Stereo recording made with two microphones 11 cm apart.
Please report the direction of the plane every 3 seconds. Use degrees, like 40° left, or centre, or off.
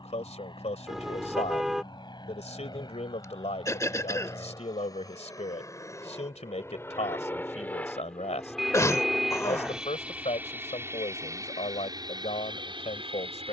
50° left, 40° left, 20° left, 20° right, 40° right.